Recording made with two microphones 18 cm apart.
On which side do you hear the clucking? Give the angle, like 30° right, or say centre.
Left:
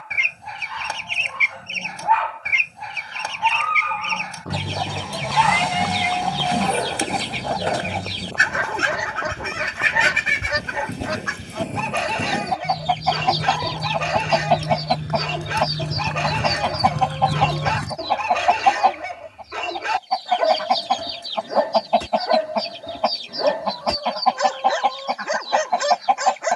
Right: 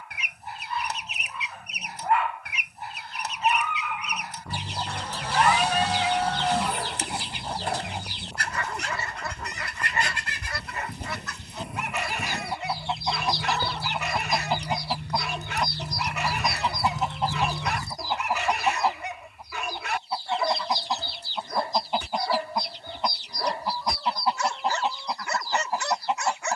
80° left.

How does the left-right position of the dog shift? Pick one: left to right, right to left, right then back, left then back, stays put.
stays put.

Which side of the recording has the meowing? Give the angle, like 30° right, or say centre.
10° left.